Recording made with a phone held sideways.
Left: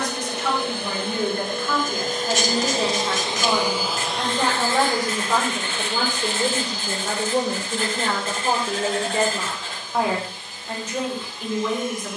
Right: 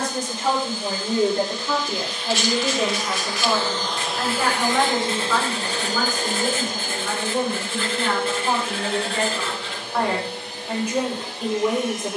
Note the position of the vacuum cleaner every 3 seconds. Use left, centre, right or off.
left, centre, right, right.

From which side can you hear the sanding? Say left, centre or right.
left.